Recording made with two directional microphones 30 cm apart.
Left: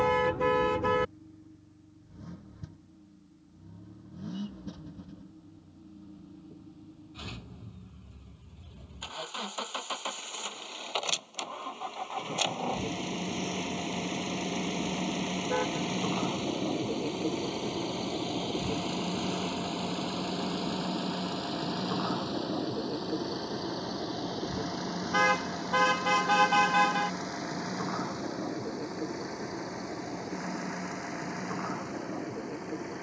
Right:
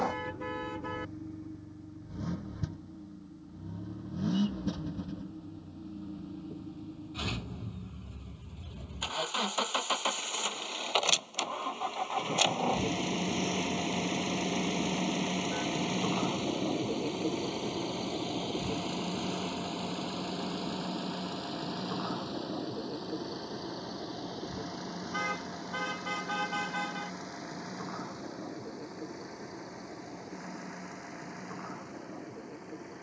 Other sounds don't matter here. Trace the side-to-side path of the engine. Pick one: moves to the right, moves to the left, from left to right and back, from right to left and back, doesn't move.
moves to the left.